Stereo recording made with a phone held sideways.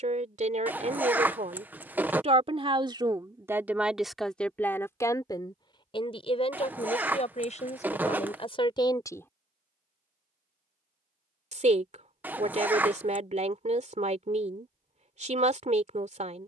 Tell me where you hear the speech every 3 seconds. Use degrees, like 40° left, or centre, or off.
50° right, centre, 40° left, 30° right, 50° right, 50° right.